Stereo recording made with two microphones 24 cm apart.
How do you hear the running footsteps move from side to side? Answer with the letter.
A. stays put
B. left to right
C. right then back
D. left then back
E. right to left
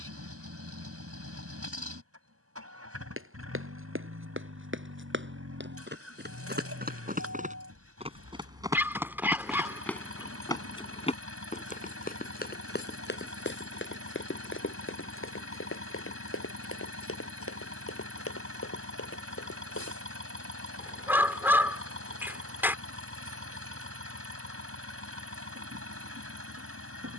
E.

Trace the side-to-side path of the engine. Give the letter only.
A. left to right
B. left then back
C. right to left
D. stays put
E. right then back
D.